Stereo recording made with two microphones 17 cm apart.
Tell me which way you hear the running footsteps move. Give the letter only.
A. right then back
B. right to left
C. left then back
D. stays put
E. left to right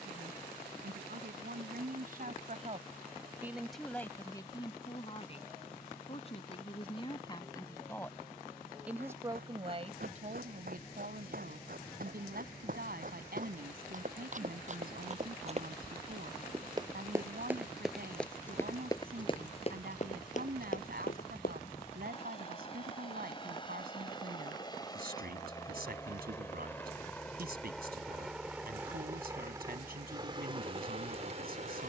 B.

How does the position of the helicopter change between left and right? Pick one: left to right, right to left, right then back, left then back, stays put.
left to right.